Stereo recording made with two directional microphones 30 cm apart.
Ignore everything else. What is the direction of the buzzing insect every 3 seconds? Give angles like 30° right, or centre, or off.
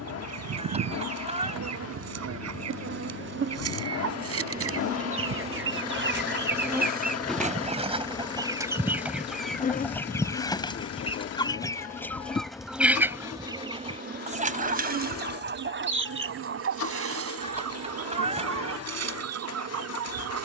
50° right, 30° right, centre, 30° left, 10° right, 50° right, 60° right.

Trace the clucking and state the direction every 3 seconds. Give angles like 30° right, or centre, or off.
60° right, 50° right, 20° right, 10° left, 10° right, 50° right, 60° right.